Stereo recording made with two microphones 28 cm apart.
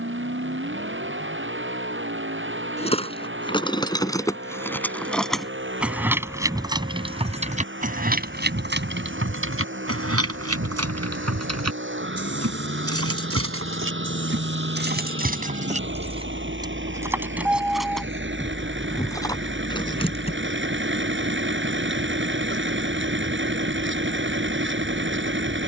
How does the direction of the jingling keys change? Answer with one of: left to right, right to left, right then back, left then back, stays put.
right then back.